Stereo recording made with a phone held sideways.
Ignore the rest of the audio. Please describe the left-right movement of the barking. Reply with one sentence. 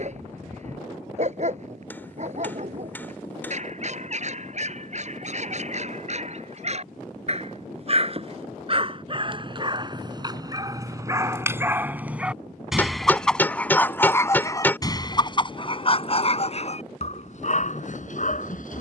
You can hear the barking move to the left.